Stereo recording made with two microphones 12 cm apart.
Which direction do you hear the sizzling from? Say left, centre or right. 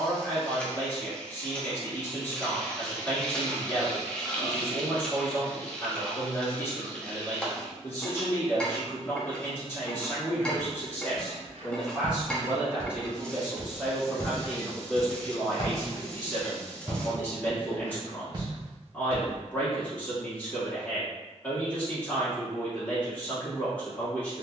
centre.